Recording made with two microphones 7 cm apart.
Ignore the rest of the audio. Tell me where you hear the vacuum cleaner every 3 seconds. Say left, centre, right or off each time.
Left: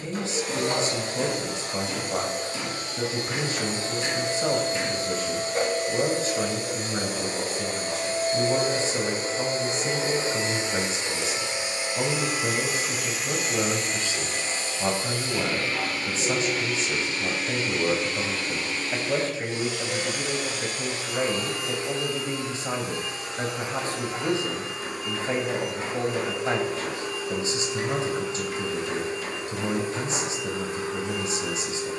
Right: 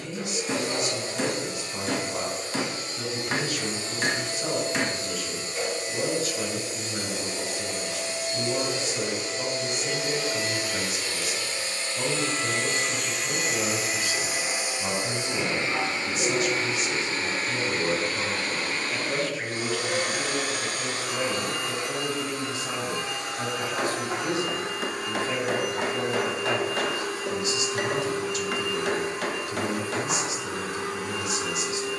left, left, left, left, centre, right, right, right, right, right, right.